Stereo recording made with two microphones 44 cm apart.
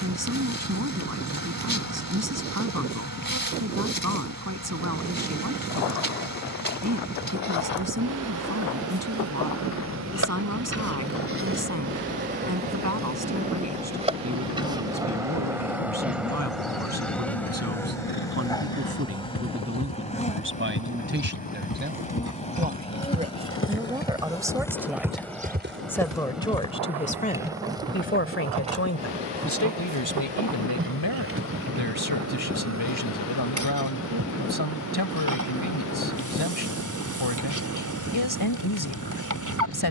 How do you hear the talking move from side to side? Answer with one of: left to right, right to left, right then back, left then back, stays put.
right to left.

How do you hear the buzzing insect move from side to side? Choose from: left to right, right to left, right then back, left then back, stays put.
left then back.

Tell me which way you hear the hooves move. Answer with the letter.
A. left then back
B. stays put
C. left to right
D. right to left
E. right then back
C.